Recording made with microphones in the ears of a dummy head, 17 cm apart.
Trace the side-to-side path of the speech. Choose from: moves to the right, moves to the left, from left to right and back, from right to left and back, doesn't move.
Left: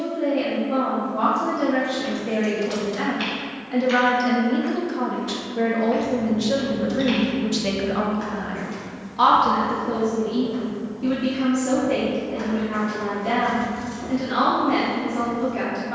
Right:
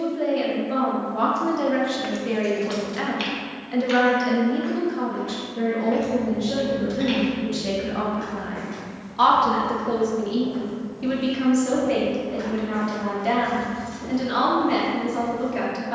from right to left and back.